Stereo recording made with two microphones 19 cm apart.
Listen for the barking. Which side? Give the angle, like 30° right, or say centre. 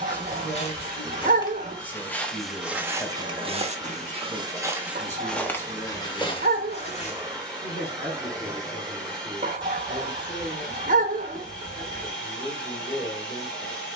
50° right.